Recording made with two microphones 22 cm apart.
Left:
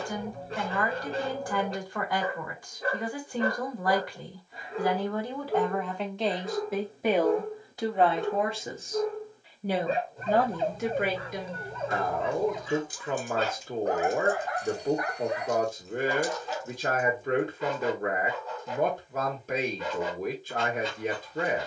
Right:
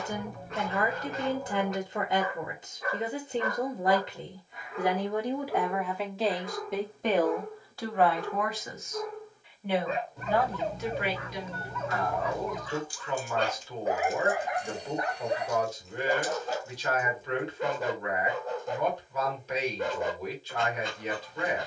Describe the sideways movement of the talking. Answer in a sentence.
You can hear the talking move to the left.